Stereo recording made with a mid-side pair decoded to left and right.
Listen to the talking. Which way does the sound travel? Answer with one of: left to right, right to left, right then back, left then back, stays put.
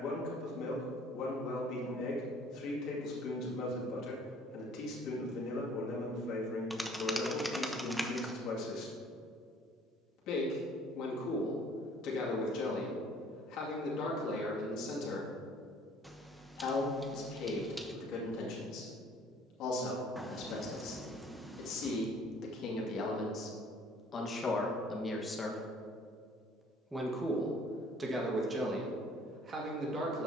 left to right.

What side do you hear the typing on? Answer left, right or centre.
centre.